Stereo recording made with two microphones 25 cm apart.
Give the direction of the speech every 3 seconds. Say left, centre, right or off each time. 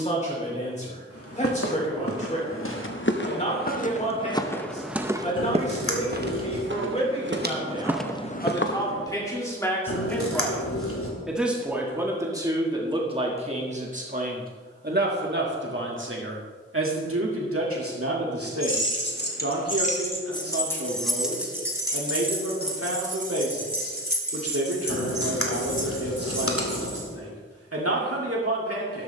left, left, left, centre, right, right, right, right, right, right.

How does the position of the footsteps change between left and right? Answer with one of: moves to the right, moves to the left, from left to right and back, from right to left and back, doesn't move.
from left to right and back.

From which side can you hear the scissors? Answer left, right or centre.
left.